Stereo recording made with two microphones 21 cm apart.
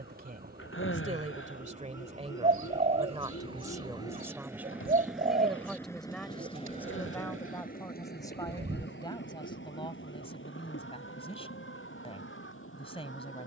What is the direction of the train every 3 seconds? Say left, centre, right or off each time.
right, centre, left, left, left.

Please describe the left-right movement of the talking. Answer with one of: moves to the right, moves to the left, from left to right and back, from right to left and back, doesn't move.
moves to the left.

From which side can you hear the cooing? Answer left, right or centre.
right.